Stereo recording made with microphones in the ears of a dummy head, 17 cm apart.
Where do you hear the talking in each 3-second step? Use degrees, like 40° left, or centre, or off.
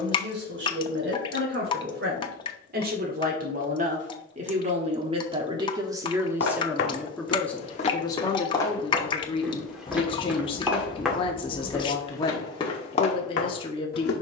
50° right, 30° right, 10° left, 30° left, 30° left.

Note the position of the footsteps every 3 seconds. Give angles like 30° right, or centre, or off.
off, off, 30° left, centre, 30° left.